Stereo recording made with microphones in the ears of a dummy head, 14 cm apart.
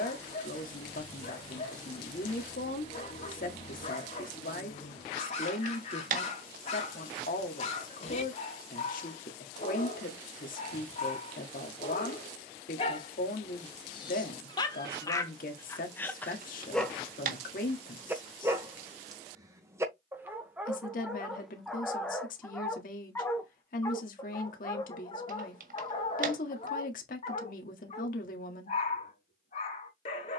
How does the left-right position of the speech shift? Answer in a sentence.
You can hear the speech stay put.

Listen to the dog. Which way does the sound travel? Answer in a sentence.
You can hear the dog go right and come back.